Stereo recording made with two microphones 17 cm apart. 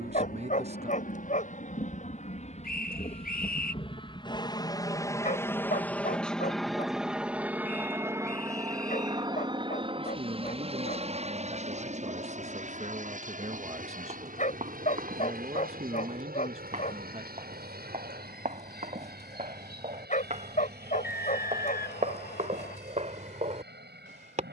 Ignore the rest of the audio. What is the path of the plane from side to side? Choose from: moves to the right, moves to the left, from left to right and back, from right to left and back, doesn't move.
moves to the right.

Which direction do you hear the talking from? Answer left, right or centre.
right.